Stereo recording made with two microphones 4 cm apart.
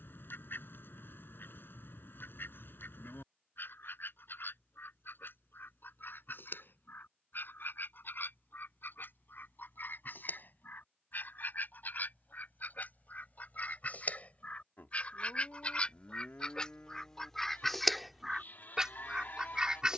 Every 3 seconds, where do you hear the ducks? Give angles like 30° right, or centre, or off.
60° left, 60° left, 60° left, 50° left, 40° left, 20° left, 10° right.